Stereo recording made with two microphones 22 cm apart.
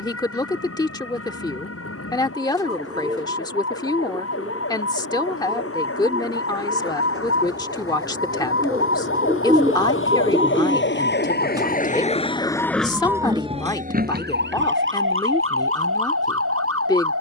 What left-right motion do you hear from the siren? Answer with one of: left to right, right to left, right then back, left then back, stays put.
left to right.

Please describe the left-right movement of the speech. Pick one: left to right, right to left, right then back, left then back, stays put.
stays put.